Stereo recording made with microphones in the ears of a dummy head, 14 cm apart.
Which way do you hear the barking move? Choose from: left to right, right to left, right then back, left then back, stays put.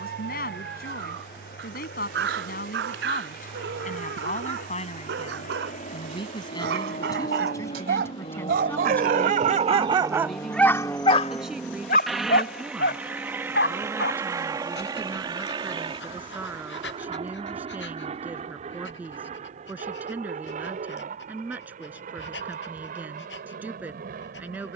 right to left.